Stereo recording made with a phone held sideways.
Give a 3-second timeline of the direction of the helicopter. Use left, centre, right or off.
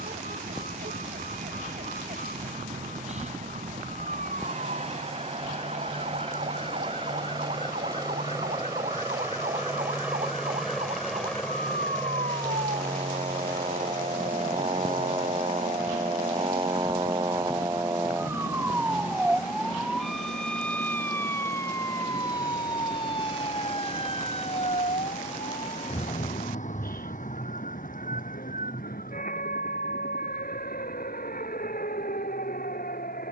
right, right, right, centre, left, left, left, left, left, left, left.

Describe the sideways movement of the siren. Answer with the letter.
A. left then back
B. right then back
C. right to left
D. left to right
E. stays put
C.